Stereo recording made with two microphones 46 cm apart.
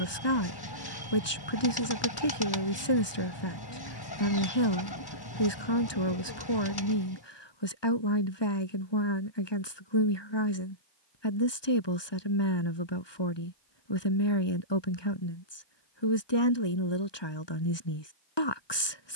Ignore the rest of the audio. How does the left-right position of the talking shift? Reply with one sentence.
In this clip you hear the talking stay put.